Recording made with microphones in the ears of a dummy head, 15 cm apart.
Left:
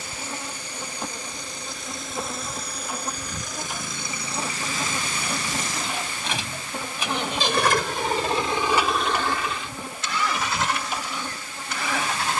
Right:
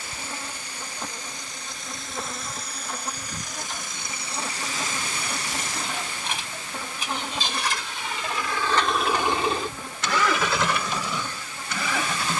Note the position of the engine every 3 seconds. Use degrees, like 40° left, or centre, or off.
70° left, 70° left, 40° left, 50° right.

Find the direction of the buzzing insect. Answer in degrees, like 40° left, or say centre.
10° left.